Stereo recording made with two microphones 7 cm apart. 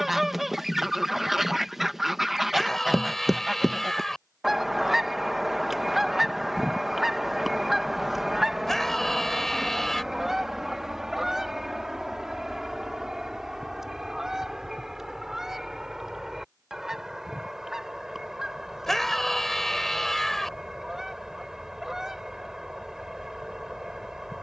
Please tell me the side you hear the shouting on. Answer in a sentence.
In this clip you hear the shouting in the centre.